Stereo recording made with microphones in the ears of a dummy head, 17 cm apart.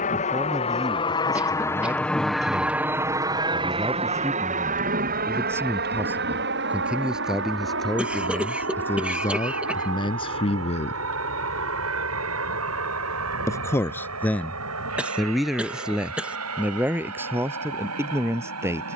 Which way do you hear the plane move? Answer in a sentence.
You can hear the plane move to the right.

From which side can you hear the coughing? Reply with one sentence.
You can hear the coughing in the centre.